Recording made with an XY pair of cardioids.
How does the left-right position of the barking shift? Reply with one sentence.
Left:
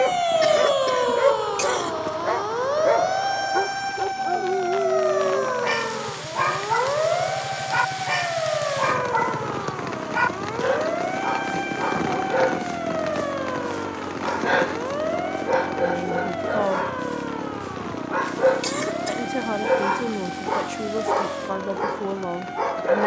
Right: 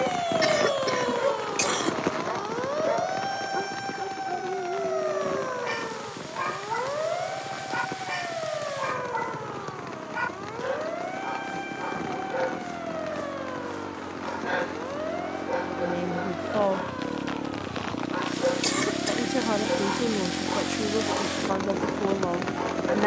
You can hear the barking stay in one place.